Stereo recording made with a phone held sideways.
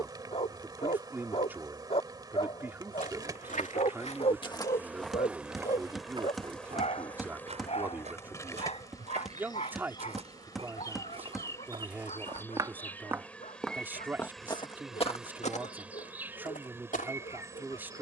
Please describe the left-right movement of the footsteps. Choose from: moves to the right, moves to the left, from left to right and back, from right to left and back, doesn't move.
from left to right and back.